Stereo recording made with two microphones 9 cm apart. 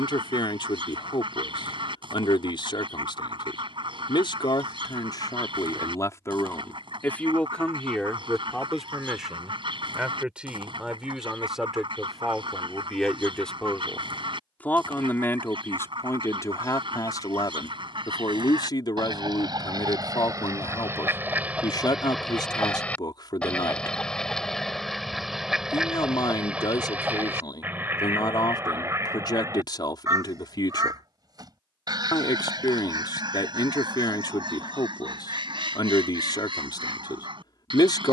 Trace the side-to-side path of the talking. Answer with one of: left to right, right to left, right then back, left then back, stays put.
right then back.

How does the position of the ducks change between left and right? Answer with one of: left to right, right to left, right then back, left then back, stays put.
left then back.